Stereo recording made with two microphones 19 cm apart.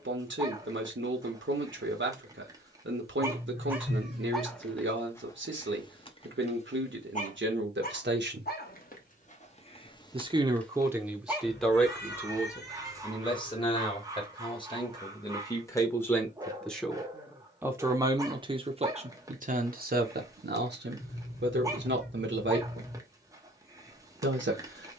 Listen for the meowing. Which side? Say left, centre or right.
left.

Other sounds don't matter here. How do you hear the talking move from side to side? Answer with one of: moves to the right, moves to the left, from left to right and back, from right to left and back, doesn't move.
from right to left and back.